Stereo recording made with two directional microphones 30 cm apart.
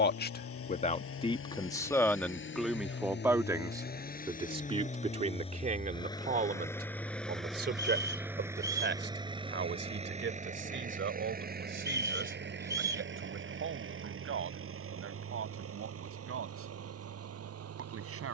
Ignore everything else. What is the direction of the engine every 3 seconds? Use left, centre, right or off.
left, left, centre, right, right, right.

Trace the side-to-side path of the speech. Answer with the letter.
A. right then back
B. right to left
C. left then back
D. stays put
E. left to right
E.